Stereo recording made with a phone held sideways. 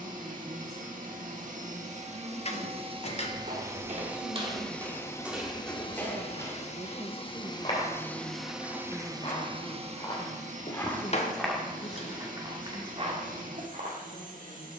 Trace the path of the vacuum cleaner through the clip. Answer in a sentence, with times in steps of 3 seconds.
You can hear the vacuum cleaner on the right from 0 s, in the centre from 3 s, on the left from 6 s and on the right from 9 s.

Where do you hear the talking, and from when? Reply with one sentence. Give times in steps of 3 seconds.
You can hear the talking on the right from 0 s and on the left from 9 s.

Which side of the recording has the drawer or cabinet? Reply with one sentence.
You can hear the drawer or cabinet on the left.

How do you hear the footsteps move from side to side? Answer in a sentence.
You can hear the footsteps move from right to left and back again.